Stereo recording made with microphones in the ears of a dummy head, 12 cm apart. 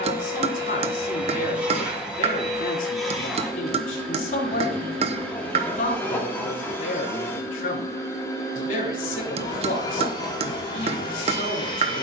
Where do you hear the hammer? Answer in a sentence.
You can hear the hammer on the right.